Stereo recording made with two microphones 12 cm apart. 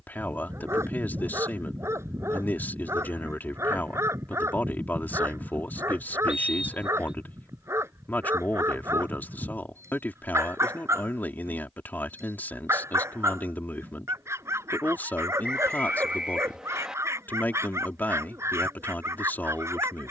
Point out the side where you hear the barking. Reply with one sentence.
In this clip you hear the barking on the right.